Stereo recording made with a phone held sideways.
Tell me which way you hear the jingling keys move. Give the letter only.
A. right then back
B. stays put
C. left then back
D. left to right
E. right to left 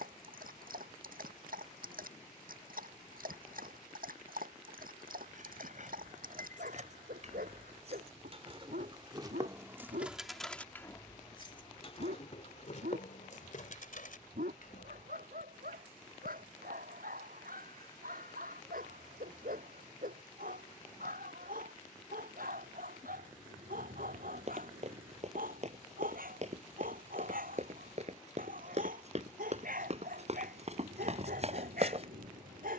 E.